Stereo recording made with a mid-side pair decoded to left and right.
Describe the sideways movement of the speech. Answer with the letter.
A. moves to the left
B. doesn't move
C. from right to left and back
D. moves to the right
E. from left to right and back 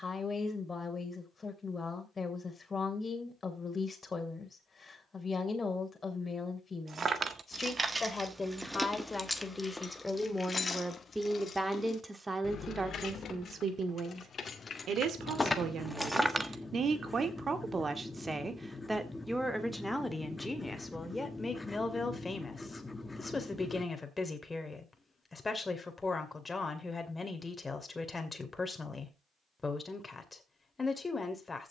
E.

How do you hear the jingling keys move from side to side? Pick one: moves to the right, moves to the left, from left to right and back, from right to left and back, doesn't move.
from right to left and back.